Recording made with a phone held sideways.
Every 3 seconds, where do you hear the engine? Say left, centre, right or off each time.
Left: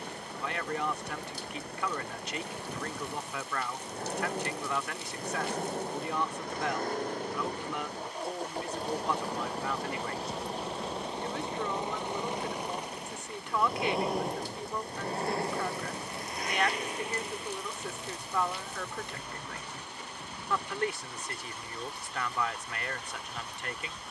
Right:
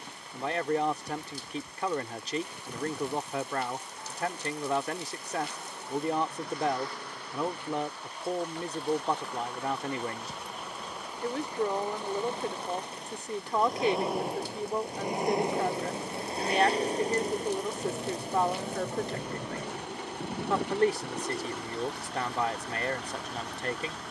left, left, left, left, centre, right, right, right.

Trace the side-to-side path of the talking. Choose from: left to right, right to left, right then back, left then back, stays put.
stays put.